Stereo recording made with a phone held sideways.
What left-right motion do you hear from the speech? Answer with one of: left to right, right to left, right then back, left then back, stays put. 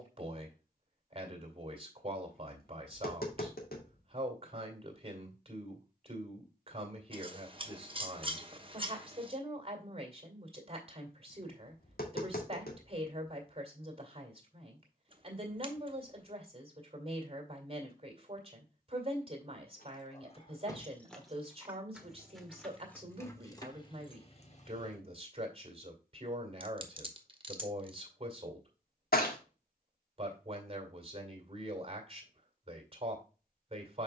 stays put.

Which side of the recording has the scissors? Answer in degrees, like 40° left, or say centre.
30° right.